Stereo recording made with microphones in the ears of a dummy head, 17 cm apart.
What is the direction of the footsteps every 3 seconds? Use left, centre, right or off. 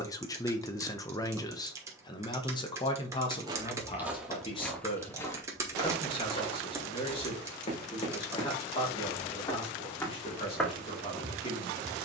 off, centre, left, centre.